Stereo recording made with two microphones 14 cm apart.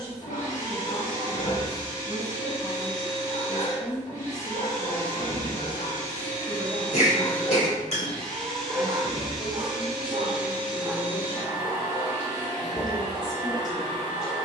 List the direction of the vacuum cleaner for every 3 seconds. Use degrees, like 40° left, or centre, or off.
20° left, 20° left, 10° left, 10° right, 30° right.